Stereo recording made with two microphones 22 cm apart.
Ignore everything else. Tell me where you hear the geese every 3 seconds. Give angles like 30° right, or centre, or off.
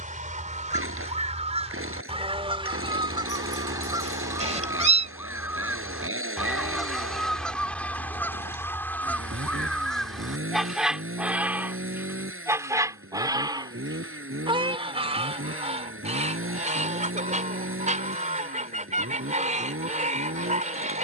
30° right, 10° right, centre, centre, 20° right, 30° right, 30° right.